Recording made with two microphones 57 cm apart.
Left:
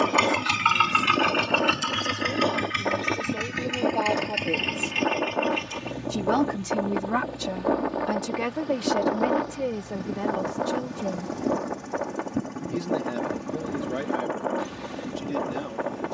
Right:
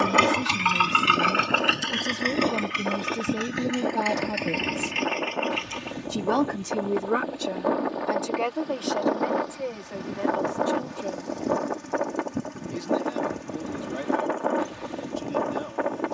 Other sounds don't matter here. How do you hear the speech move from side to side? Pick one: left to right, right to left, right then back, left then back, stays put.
right to left.